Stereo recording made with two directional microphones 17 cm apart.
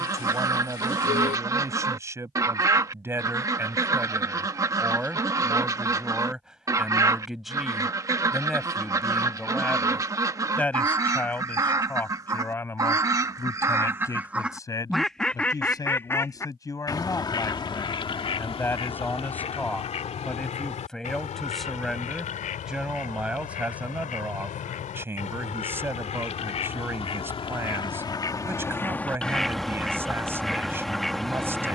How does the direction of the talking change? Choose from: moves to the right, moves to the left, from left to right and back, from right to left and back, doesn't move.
from right to left and back.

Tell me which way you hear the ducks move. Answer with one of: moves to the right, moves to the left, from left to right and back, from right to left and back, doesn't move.
from right to left and back.